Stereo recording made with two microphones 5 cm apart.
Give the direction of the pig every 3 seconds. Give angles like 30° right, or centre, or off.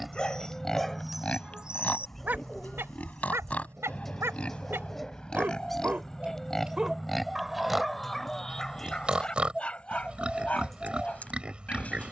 20° left, 20° left, centre, 20° right.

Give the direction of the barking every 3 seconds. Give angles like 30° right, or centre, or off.
10° right, 50° right, centre, 30° left.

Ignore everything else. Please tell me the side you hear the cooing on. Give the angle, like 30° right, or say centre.
centre.